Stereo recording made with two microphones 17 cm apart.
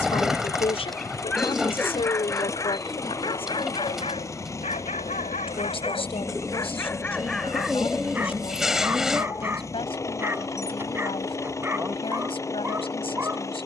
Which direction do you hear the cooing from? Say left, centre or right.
centre.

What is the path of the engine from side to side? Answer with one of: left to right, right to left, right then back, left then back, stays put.
stays put.